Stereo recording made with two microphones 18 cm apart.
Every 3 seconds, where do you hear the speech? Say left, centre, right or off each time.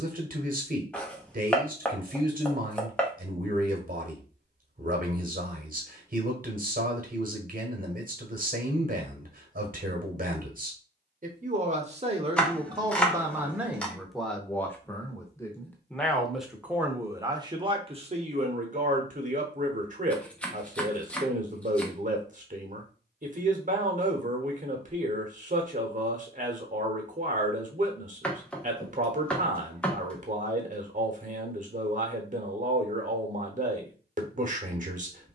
right, right, right, right, centre, centre, right, right, right, right, right, right.